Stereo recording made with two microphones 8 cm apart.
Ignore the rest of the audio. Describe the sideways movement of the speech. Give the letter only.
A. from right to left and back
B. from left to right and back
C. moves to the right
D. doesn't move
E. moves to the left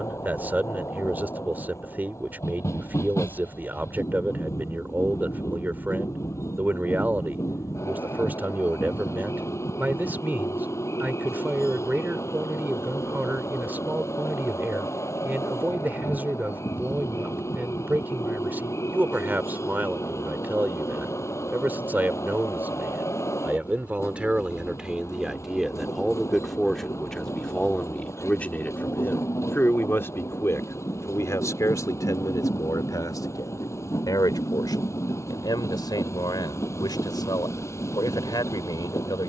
E.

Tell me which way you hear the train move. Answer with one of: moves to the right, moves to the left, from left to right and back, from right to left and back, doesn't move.
doesn't move.